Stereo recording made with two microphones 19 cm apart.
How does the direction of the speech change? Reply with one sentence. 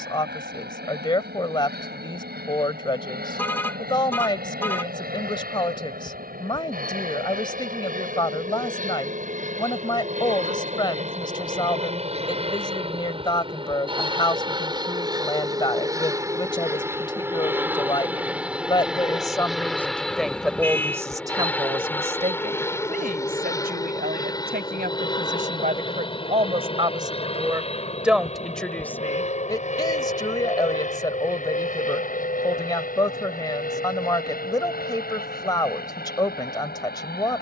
You can hear the speech move from left to right and back again.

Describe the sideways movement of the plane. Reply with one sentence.
In this clip you hear the plane move to the left.